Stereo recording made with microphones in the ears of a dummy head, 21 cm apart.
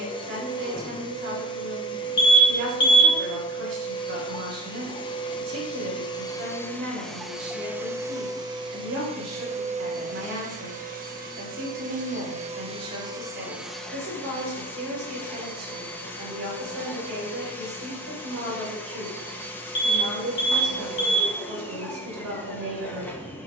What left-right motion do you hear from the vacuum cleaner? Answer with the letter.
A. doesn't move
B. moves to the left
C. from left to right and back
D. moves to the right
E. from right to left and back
C.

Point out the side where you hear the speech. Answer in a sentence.
You can hear the speech on the right.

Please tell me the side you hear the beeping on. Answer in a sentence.
In this clip you hear the beeping on the left.